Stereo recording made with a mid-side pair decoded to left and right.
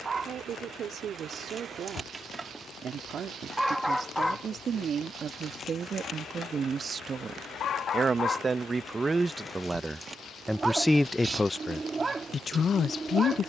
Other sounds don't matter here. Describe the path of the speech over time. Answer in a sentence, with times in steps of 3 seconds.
In this clip you hear the speech on the right from 0 s, in the centre from 9 s and on the left from 12 s.